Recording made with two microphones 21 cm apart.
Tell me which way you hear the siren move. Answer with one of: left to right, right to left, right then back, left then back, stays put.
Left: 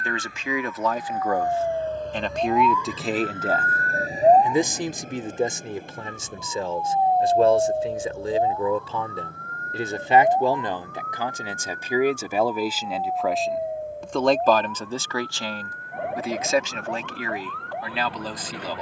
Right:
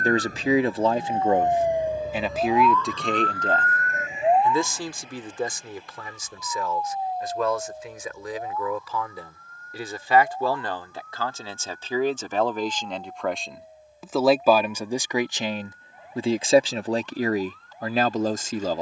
right to left.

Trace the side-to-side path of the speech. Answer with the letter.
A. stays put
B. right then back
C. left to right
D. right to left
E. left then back
E.